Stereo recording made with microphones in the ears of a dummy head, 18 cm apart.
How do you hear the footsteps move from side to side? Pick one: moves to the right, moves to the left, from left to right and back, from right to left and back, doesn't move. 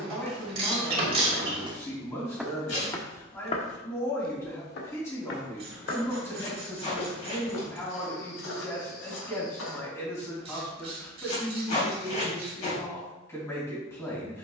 moves to the left.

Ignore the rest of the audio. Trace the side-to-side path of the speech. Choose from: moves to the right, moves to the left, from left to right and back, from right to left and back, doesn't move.
doesn't move.